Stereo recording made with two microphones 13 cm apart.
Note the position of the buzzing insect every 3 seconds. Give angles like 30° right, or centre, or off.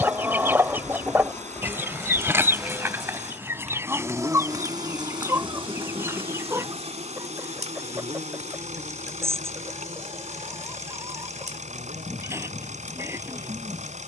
10° left, 30° right, 50° right, 70° right, 70° right.